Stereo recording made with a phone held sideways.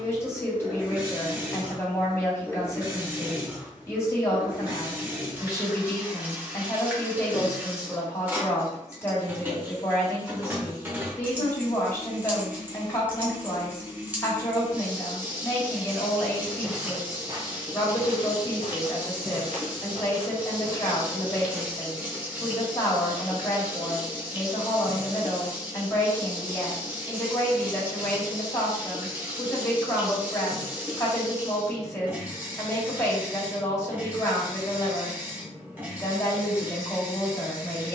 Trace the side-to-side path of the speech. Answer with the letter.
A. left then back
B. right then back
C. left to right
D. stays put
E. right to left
D.